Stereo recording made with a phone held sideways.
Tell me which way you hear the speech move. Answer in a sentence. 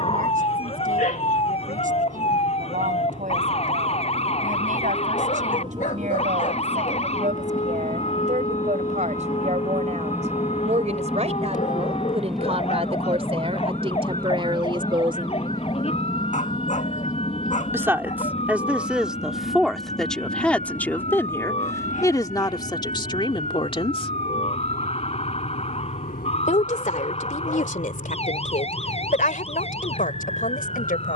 You can hear the speech move from right to left.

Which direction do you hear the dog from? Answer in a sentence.
In this clip you hear the dog on the left.